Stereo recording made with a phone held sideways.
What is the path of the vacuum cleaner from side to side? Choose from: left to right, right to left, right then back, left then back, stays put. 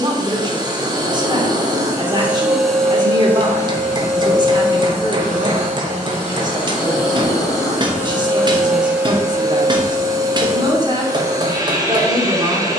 left then back.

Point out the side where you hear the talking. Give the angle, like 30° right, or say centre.
30° right.